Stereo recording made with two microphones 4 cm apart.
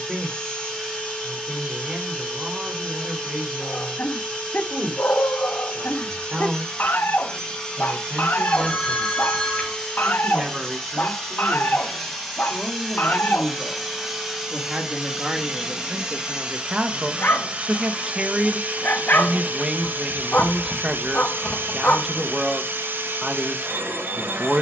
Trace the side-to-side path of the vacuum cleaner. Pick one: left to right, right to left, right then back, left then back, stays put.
left to right.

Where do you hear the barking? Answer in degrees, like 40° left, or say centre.
50° left.